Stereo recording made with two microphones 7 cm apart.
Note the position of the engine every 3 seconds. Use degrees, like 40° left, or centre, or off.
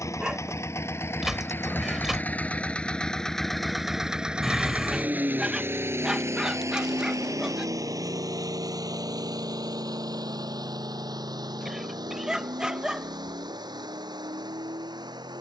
30° left, 10° right, 50° right, 70° right, 80° right.